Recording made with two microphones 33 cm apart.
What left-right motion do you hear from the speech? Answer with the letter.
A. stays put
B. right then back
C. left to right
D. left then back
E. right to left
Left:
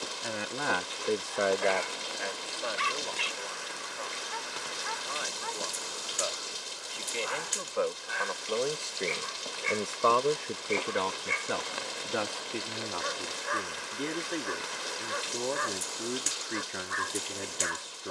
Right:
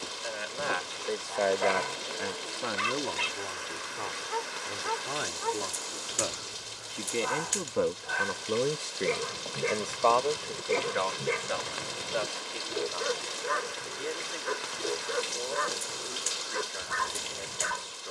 B.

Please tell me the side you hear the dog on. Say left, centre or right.
right.